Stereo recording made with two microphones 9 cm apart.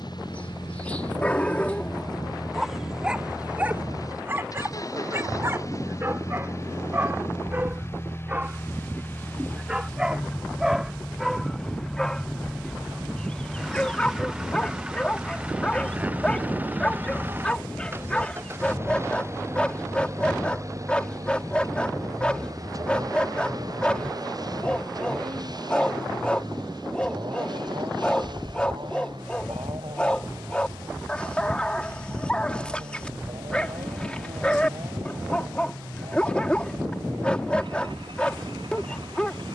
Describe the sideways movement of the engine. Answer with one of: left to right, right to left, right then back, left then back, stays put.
left to right.